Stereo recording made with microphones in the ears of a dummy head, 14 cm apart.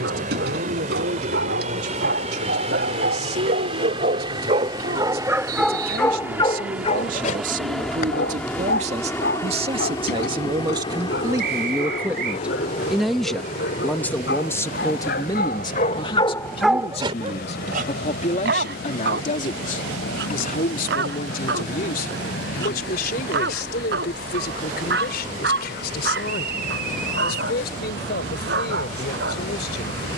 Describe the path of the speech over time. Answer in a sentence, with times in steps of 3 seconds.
In this clip you hear the speech on the right from 0 s, in the centre from 12 s and on the left from 15 s.